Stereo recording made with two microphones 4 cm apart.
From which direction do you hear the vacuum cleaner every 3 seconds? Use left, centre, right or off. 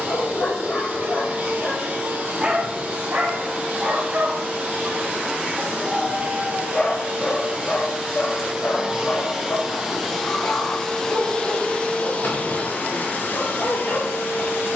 right, right, right, centre, left.